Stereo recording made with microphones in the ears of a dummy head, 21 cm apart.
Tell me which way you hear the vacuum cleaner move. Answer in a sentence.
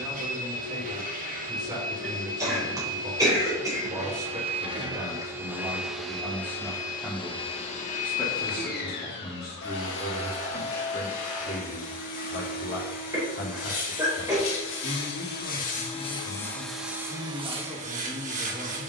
You can hear the vacuum cleaner move from right to left and back again.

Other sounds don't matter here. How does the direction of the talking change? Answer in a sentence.
You can hear the talking move from right to left and back again.